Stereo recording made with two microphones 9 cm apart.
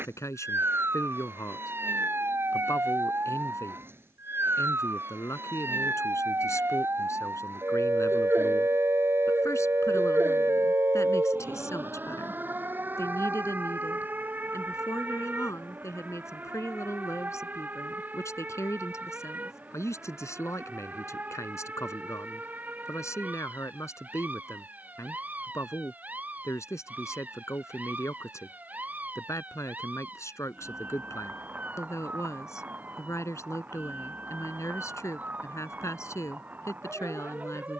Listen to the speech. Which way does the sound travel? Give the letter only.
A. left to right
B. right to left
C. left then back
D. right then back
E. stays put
E.